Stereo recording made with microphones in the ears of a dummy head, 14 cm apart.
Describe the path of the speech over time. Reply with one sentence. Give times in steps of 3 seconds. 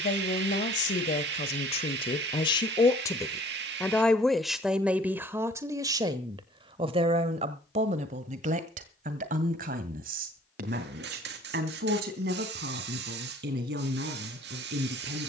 In this clip you hear the speech on the left from 0 s, in the centre from 3 s and on the right from 6 s.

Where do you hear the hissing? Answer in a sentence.
In this clip you hear the hissing on the right.